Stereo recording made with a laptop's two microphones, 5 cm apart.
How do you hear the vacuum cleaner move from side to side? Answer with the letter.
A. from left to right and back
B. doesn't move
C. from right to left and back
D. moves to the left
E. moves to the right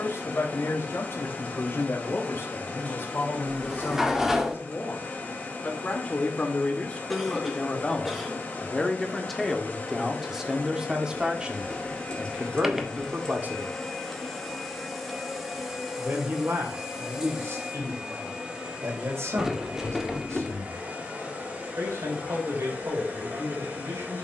E.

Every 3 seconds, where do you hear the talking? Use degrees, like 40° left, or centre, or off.
50° left, 40° left, 20° left, 10° right, 30° right, 60° right, 70° right, 70° right.